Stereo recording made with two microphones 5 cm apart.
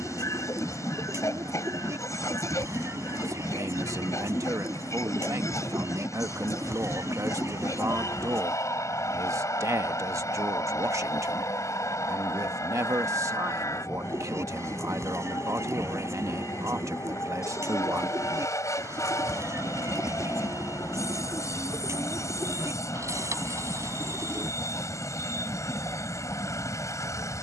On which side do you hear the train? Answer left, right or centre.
left.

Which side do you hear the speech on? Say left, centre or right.
right.